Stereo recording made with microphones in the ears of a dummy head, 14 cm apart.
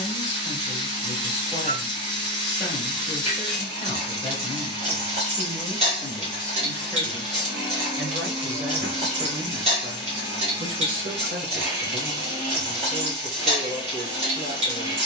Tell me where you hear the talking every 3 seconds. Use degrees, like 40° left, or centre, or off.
20° left, 20° left, centre, 40° right, 50° right.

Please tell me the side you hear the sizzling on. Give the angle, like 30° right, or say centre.
40° right.